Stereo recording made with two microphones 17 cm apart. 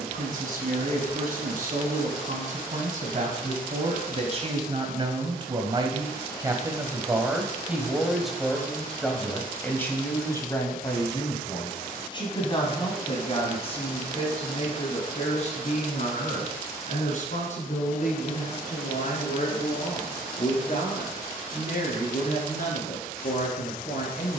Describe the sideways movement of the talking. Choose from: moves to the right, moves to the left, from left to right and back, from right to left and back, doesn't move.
moves to the left.